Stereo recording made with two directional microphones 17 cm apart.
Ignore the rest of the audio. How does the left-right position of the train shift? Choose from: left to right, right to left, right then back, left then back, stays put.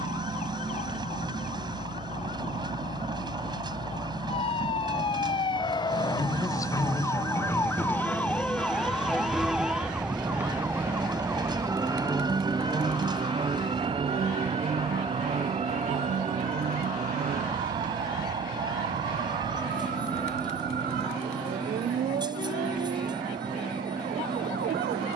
stays put.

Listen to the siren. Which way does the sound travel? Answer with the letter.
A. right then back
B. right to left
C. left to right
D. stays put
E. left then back
C.